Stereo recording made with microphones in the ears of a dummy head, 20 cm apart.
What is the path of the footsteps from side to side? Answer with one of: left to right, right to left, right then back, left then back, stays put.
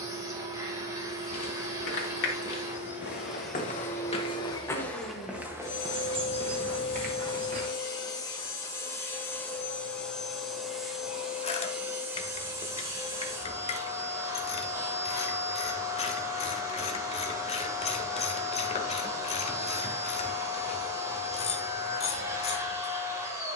left to right.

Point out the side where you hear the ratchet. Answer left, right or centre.
left.